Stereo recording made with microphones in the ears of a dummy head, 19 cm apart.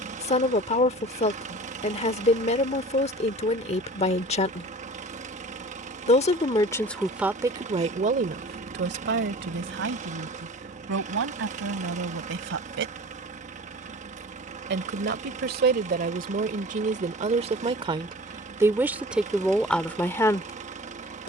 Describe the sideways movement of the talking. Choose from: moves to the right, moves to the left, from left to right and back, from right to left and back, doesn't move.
from left to right and back.